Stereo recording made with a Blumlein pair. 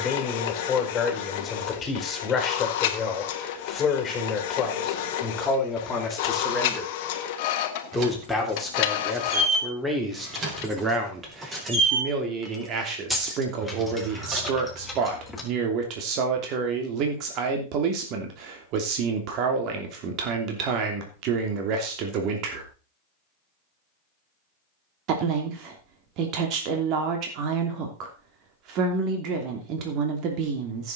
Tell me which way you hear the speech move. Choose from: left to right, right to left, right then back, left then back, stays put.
left to right.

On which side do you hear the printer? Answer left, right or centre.
left.